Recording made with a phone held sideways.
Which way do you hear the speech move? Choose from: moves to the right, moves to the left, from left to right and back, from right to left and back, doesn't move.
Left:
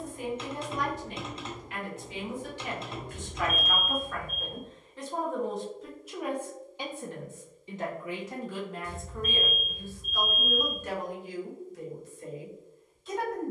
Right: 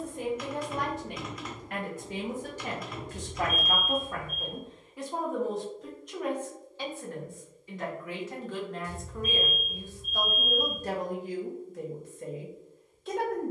from right to left and back.